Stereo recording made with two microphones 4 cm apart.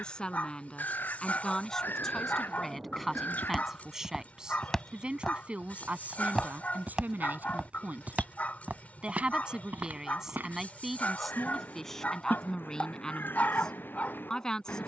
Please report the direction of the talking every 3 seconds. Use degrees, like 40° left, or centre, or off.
10° left, 10° right, 40° right, 10° right, 20° left.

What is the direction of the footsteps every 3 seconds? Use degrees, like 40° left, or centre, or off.
off, 10° left, 20° right, 50° right, off.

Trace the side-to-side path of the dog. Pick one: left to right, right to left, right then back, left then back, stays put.
stays put.